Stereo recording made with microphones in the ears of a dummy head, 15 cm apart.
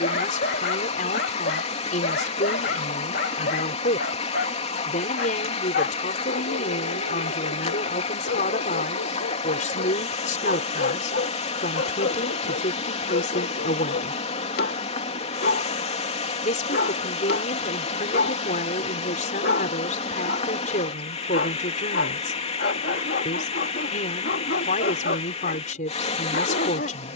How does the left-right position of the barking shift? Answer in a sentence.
In this clip you hear the barking stay put.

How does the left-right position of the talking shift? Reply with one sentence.
You can hear the talking stay put.